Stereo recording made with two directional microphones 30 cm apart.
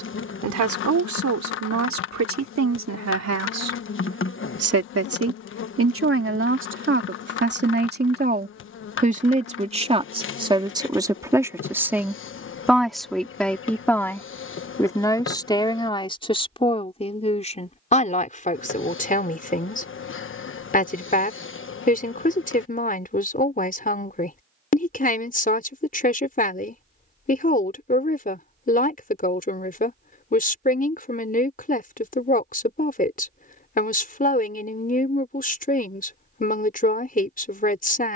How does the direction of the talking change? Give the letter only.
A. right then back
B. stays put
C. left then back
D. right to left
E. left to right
D.